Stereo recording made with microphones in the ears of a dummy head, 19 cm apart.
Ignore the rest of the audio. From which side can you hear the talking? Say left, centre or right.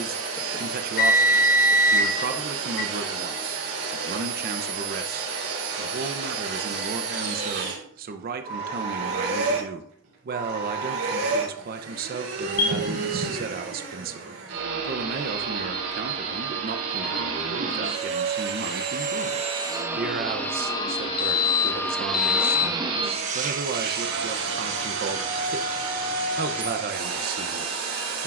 right.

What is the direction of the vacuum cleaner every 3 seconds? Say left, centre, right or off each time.
right, right, right, right, right, right, right, centre, right, right.